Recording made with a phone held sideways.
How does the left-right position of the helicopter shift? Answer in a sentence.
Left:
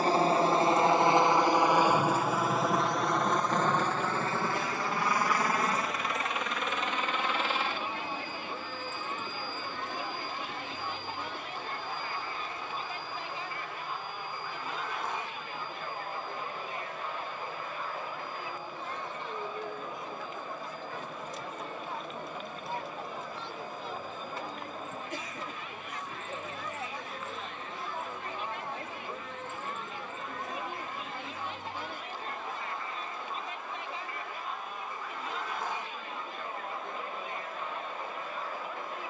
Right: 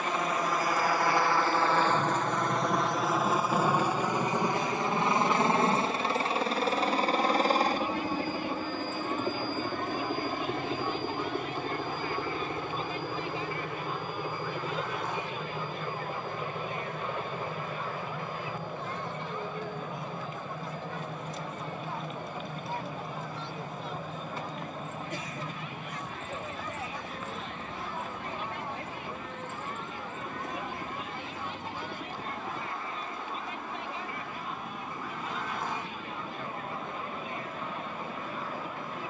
You can hear the helicopter travel towards the right.